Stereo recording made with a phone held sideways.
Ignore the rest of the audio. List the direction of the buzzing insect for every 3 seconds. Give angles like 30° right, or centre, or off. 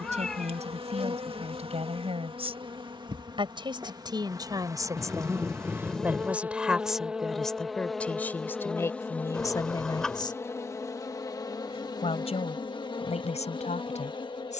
40° right, 20° right, centre, 20° left, 30° left.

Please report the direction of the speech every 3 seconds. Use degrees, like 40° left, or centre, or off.
50° right, 30° right, centre, 30° left, 50° left.